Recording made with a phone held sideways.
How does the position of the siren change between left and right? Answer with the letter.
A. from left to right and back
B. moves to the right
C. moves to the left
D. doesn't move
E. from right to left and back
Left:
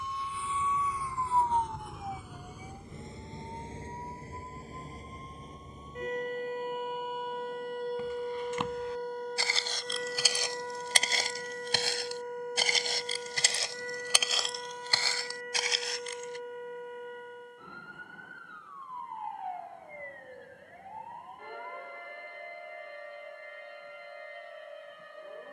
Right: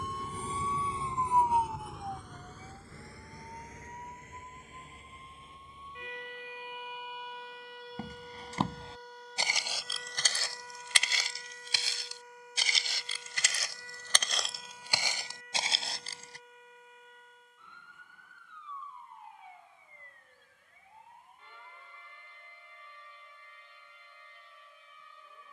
C.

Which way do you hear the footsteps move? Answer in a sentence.
You can hear the footsteps move from right to left and back again.